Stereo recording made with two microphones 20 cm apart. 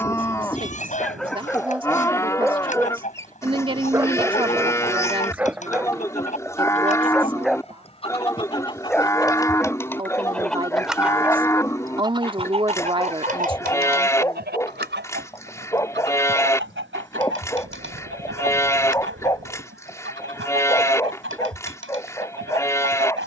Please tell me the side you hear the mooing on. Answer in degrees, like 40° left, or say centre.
10° left.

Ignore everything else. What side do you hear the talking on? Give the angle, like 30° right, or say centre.
20° right.